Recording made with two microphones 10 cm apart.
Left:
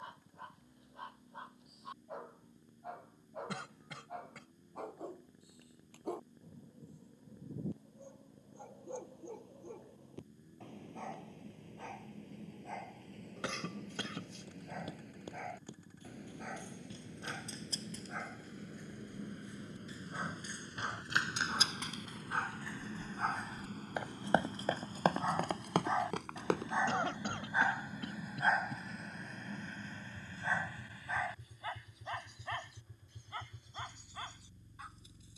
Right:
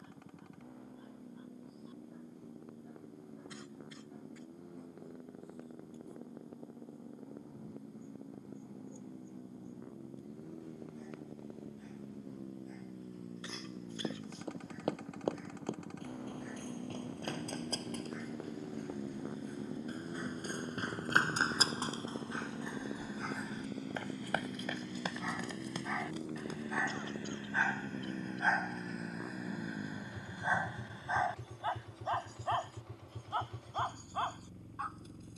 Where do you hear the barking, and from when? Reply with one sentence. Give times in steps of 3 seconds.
You can hear the barking on the left from 0 s, in the centre from 27 s and on the right from 30 s.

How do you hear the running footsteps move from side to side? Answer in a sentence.
In this clip you hear the running footsteps travel towards the left.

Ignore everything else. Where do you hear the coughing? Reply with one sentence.
You can hear the coughing on the left.